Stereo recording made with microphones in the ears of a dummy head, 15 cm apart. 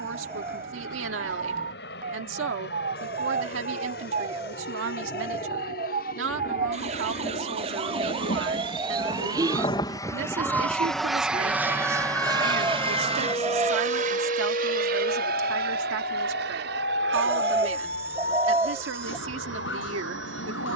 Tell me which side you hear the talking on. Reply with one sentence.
You can hear the talking on the right.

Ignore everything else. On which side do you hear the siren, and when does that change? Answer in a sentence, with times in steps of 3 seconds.
You can hear the siren on the right from 0 s, in the centre from 9 s and on the left from 12 s.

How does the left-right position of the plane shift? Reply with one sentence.
You can hear the plane travel towards the right.